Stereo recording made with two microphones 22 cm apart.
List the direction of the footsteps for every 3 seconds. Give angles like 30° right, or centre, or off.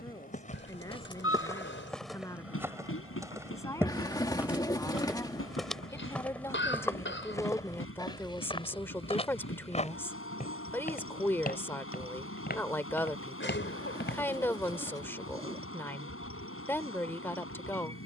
10° left, 10° right, 20° left, 40° left, 50° left, off.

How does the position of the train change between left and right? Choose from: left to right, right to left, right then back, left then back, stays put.
stays put.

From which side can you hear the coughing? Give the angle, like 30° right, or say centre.
60° left.